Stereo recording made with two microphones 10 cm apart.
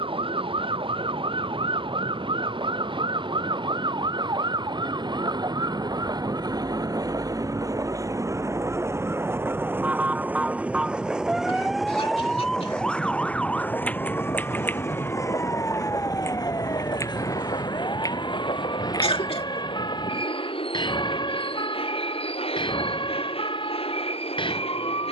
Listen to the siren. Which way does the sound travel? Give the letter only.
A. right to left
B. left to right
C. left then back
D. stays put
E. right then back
A.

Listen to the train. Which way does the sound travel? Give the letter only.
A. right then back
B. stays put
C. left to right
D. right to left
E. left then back
D.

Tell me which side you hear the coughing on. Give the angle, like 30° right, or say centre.
70° left.